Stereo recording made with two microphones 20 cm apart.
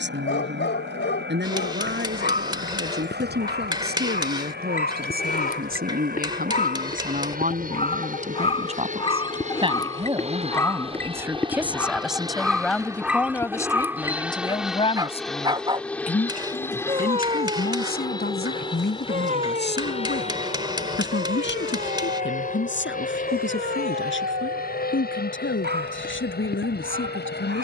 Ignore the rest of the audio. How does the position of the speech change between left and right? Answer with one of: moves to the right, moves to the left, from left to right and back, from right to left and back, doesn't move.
moves to the left.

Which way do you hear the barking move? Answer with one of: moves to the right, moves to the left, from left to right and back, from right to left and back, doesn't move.
moves to the right.